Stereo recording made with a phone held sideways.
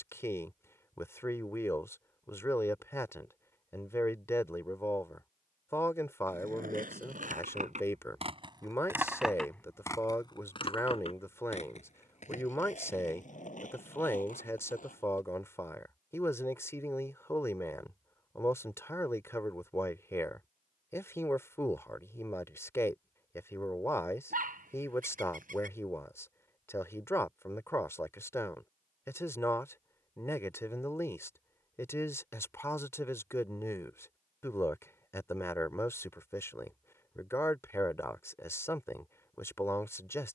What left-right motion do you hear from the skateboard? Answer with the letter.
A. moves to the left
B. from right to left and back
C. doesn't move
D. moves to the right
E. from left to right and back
A.